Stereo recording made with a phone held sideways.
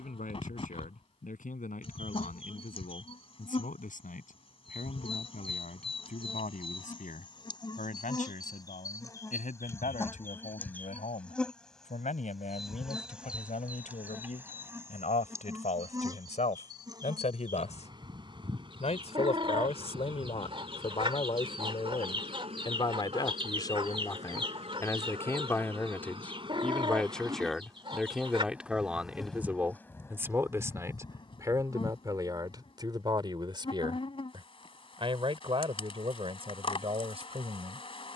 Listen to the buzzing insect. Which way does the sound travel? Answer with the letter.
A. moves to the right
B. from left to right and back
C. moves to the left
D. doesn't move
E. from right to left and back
B.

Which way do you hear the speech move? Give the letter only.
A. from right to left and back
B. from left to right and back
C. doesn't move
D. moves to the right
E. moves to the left
D.